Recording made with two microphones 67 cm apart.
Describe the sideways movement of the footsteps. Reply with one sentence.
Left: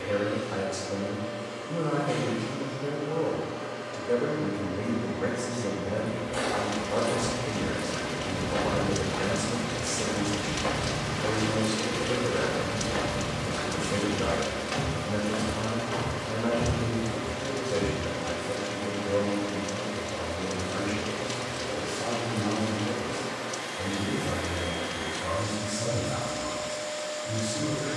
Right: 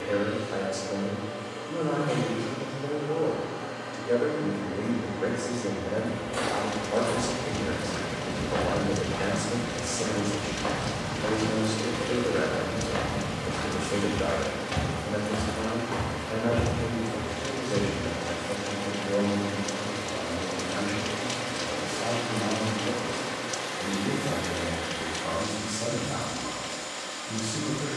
In this clip you hear the footsteps move from right to left and back again.